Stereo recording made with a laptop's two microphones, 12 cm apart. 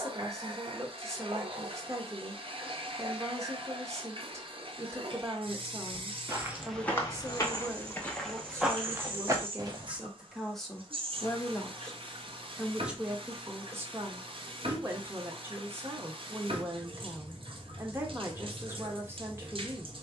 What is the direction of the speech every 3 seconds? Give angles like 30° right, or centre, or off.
30° right, 30° right, 30° right, centre, 20° right, 20° right, 20° right.